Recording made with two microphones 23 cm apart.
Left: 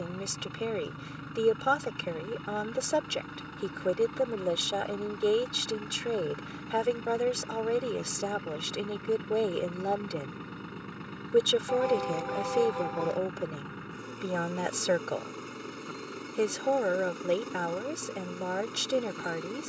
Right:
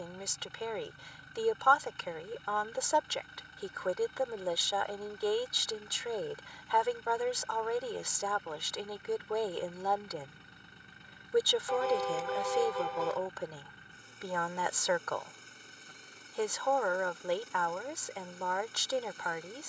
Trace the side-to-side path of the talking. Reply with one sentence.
In this clip you hear the talking stay in one place.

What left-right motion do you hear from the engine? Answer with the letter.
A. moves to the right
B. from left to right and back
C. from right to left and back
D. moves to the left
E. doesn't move
E.